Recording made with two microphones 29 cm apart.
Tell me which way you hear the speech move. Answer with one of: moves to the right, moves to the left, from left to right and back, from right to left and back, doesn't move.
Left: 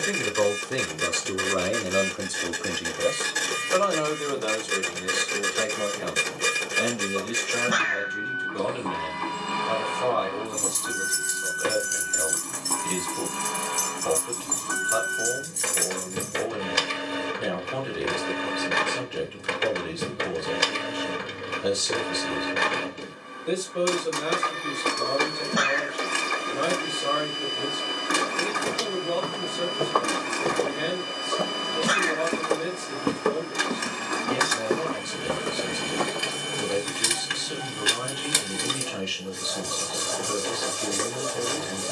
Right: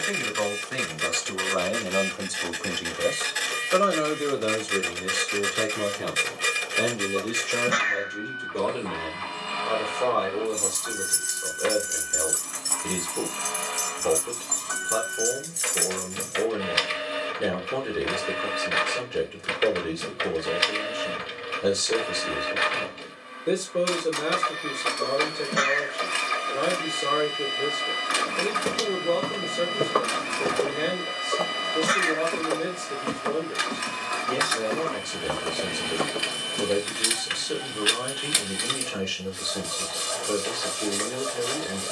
moves to the right.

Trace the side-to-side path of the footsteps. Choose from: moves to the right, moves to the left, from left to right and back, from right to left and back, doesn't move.
from right to left and back.